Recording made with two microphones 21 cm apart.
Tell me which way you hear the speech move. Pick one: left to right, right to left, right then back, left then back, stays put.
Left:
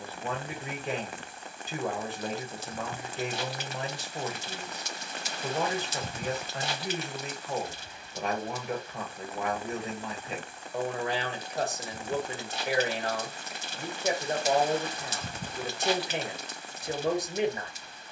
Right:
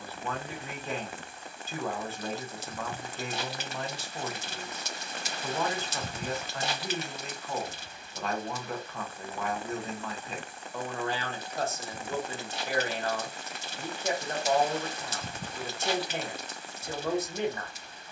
stays put.